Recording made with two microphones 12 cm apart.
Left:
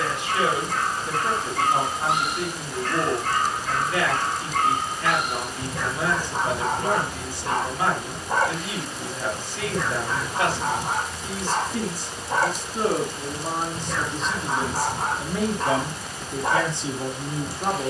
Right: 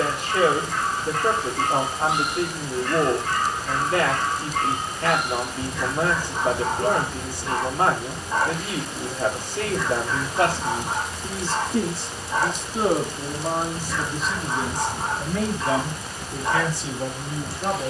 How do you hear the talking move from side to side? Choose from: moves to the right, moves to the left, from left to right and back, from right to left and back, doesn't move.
moves to the left.